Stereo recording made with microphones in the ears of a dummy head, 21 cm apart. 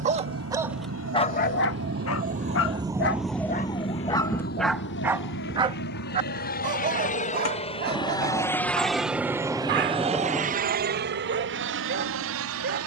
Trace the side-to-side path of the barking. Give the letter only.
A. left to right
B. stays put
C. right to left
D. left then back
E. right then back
D.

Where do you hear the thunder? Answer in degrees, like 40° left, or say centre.
centre.